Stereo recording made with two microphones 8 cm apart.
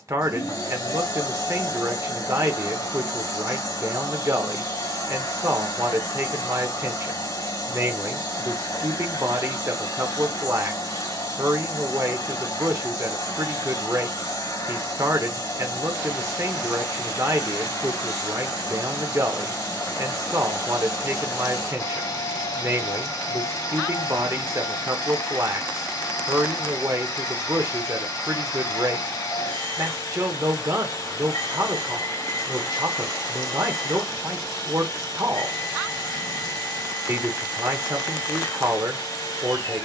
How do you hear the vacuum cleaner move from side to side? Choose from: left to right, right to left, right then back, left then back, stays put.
stays put.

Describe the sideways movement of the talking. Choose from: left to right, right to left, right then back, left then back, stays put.
stays put.